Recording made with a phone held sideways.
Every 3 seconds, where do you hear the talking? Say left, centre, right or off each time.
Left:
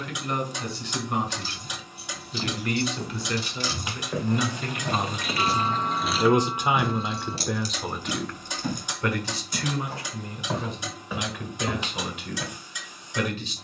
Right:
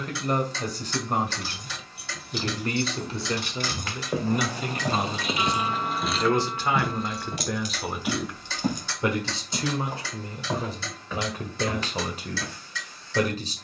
right, centre, centre, right, right.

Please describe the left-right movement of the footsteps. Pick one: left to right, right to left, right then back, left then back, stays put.
right then back.